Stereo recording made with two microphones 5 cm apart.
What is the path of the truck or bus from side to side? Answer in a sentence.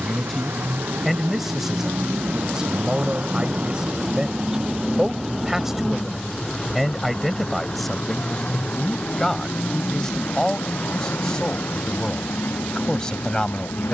You can hear the truck or bus move from right to left.